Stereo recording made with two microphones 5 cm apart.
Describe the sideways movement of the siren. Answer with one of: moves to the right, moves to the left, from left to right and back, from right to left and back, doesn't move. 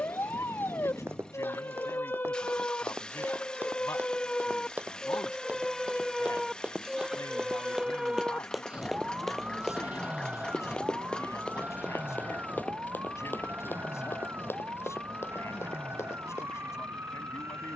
moves to the right.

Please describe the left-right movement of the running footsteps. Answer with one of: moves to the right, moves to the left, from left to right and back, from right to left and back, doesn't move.
moves to the left.